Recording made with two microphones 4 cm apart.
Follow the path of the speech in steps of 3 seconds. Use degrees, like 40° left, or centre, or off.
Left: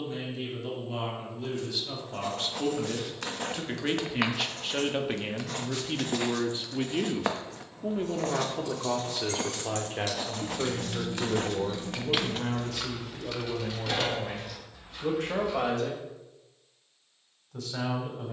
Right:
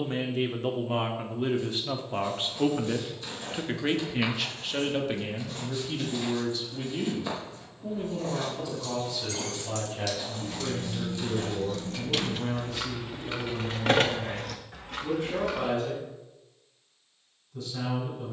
40° right, centre, 40° left, 60° left, 70° left, 80° left.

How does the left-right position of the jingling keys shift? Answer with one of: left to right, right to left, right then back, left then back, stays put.
left to right.